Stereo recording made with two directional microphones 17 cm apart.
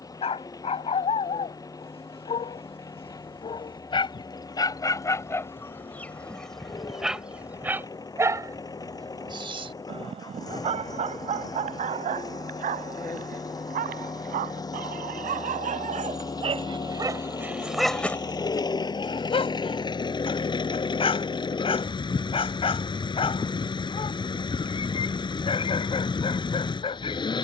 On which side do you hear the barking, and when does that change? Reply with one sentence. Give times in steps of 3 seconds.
In this clip you hear the barking on the left from 0 s, in the centre from 6 s, on the right from 9 s and on the left from 18 s.